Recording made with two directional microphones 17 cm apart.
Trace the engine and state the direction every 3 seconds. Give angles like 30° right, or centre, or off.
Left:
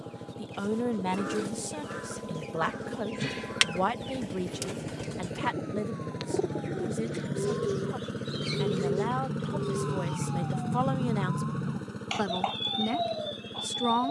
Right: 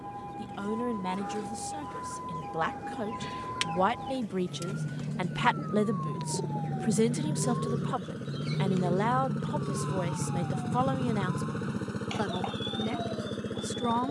60° left, 50° left, 30° left, centre, 40° right.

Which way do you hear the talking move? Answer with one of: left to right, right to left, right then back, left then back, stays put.
right then back.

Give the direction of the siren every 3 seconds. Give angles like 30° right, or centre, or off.
60° right, 50° right, 30° right, 10° left, 50° left.